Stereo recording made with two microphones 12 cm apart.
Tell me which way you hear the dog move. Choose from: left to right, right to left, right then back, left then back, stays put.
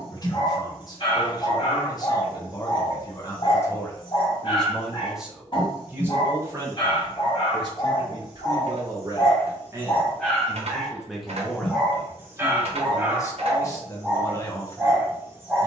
left to right.